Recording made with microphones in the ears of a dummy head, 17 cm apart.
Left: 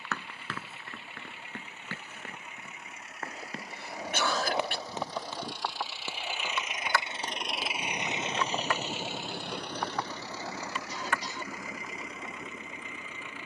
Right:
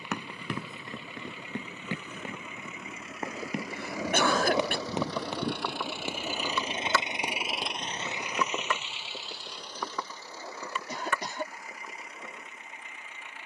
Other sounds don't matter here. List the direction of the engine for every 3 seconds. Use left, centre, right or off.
right, right, centre, left, left.